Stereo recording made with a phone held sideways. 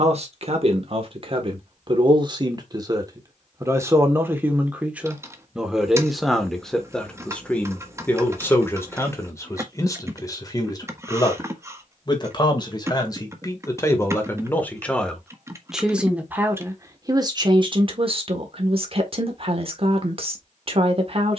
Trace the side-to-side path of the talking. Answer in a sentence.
You can hear the talking go left and come back.